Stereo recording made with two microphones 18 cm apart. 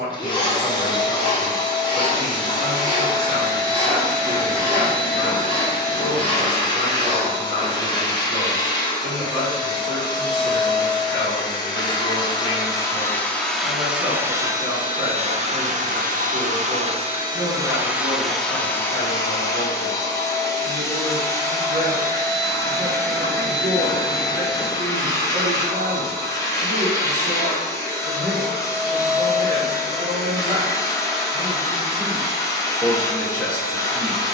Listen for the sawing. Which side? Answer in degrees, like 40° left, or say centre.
30° left.